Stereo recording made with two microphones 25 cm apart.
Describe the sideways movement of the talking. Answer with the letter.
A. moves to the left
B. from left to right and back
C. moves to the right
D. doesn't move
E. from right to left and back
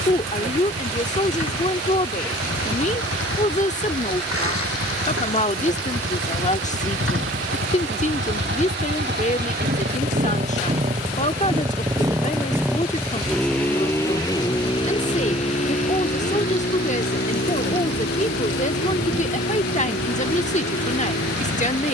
D.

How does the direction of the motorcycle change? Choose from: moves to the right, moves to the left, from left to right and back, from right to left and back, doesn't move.
moves to the left.